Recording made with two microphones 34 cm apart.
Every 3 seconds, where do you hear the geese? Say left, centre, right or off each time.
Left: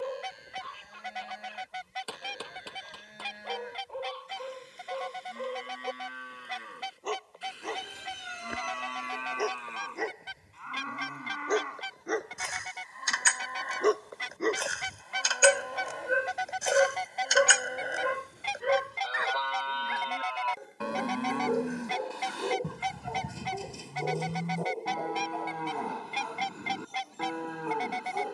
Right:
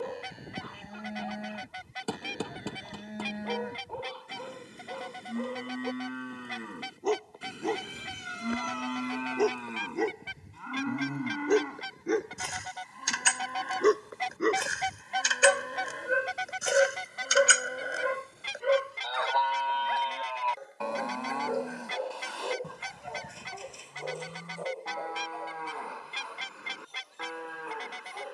left, left, left, left, left, centre, right, right, right, right.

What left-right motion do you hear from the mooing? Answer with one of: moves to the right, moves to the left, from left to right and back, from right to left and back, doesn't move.
moves to the left.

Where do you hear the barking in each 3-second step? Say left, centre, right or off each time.
right, right, right, right, right, centre, left, left, left, left.